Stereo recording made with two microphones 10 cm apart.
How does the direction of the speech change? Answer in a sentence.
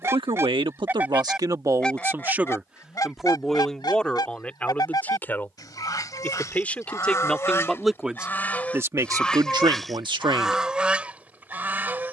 You can hear the speech move from right to left and back again.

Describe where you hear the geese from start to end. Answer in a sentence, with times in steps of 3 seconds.
You can hear the geese in the centre from 0 s, on the left from 3 s and in the centre from 9 s.